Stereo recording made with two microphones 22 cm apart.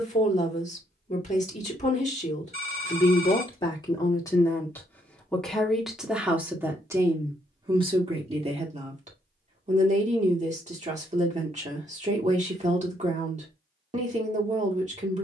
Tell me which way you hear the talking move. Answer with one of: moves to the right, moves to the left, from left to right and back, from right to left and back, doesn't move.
moves to the right.